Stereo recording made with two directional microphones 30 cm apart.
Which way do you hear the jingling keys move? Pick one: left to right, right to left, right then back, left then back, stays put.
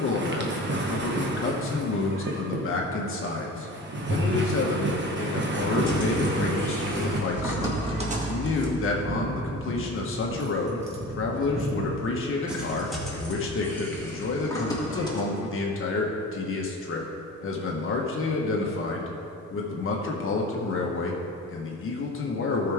right then back.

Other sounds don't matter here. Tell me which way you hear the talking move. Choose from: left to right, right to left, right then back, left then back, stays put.
stays put.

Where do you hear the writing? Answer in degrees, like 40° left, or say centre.
40° right.